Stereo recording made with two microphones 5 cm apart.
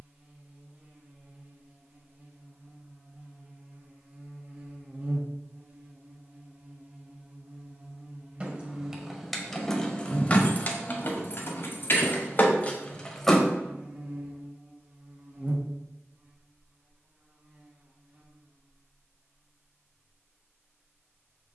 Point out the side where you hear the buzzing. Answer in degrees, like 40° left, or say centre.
30° right.